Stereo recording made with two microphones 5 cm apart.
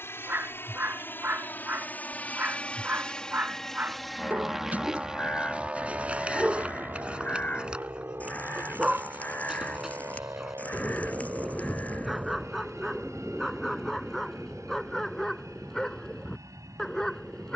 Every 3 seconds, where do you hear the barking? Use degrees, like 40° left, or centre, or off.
40° right, 30° right, 20° right, 10° right, centre, 10° left.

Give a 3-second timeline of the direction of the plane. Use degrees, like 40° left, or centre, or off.
40° left, centre, 40° right, 50° right, 60° right, 70° right.